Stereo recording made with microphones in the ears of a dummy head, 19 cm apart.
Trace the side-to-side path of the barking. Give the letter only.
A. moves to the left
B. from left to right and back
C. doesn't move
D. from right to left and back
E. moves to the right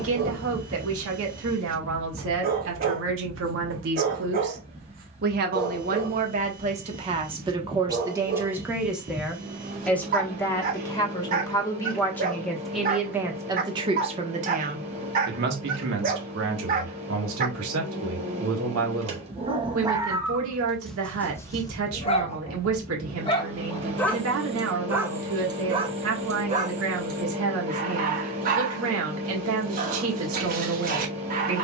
D.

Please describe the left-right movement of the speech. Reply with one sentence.
In this clip you hear the speech move from right to left and back again.